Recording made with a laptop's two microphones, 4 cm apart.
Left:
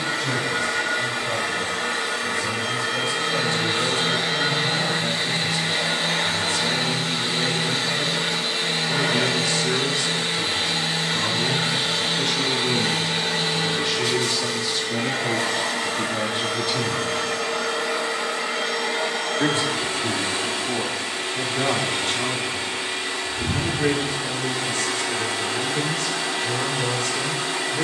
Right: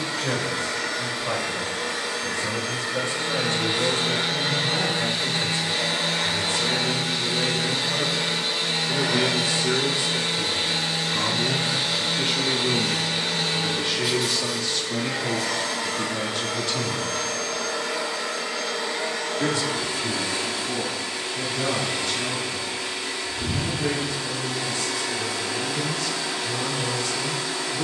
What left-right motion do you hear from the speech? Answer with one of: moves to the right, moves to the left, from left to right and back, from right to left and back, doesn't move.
moves to the left.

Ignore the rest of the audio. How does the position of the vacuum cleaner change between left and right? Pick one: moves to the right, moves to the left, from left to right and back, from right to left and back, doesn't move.
doesn't move.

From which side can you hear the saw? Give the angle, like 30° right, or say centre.
10° right.